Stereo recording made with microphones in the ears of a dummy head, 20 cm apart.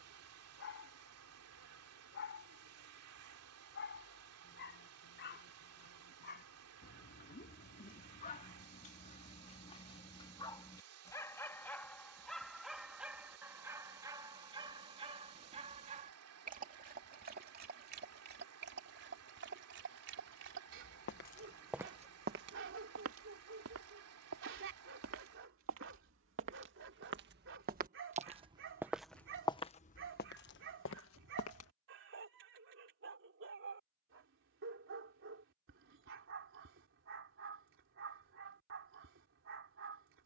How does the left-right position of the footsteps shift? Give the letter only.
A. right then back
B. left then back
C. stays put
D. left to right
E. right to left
A.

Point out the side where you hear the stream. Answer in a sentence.
You can hear the stream on the right.